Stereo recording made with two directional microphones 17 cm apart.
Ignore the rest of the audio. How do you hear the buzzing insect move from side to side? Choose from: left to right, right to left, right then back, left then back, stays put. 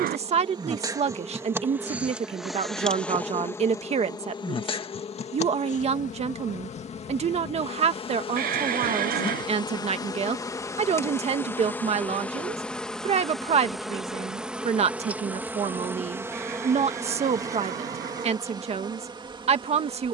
left then back.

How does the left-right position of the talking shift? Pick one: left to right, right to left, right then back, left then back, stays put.
stays put.